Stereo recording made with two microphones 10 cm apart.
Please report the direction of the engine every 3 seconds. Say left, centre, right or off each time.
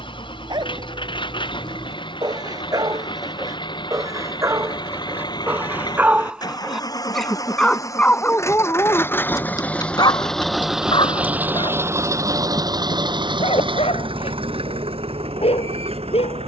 left, left, left, centre, right, right.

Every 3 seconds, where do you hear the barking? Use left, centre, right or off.
right, right, centre, left, left, left.